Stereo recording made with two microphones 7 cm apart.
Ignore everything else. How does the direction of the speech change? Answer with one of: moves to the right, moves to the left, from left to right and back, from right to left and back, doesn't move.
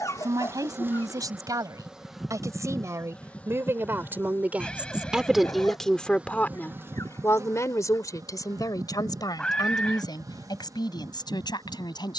moves to the left.